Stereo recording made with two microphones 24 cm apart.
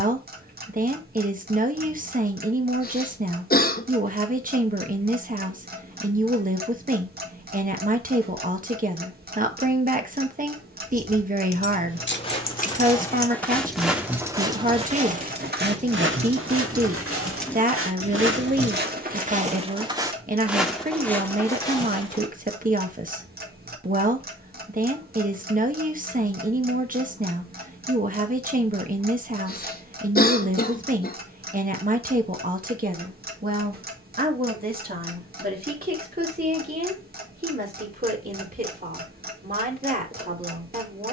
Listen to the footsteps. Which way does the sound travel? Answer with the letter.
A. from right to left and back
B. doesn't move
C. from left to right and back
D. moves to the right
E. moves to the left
C.